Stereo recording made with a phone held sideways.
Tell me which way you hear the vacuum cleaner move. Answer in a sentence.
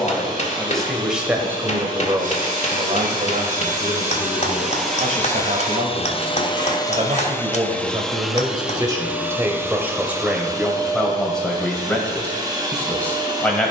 You can hear the vacuum cleaner go left and come back.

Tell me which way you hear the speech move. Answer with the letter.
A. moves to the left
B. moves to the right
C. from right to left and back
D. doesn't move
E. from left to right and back
E.